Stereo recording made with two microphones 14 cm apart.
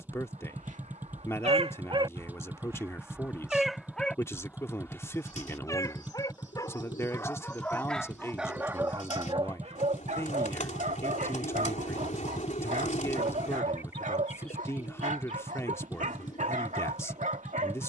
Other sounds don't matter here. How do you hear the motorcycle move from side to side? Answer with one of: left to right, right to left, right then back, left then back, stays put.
stays put.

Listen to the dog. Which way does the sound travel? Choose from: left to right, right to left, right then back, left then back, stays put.
left then back.